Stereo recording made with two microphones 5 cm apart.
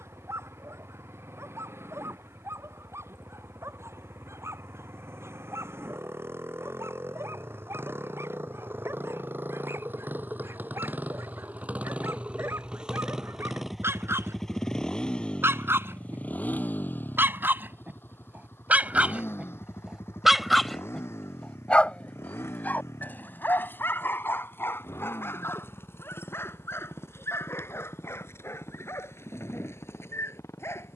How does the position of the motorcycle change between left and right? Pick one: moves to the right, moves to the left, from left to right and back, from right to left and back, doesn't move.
moves to the left.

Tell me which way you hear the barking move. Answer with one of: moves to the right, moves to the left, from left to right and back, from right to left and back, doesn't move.
moves to the left.